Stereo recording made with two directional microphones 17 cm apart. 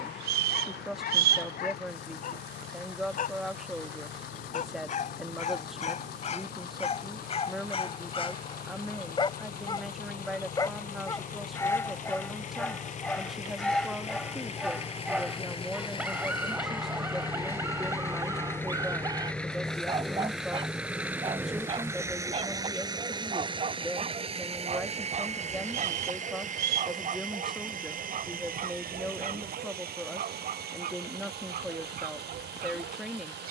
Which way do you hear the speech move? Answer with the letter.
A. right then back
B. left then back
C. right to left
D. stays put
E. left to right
D.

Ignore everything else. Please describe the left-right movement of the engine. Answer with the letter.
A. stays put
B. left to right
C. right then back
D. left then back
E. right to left
B.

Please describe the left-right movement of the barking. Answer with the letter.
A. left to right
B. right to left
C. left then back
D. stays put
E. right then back
A.